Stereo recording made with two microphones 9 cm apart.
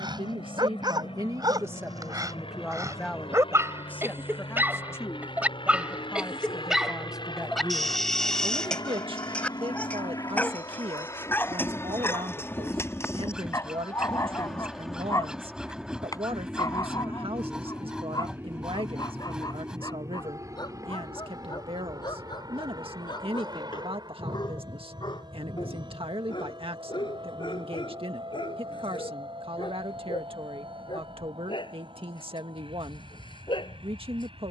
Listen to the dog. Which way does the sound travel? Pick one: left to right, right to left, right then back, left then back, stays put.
right to left.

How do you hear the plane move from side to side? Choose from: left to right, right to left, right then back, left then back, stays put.
left to right.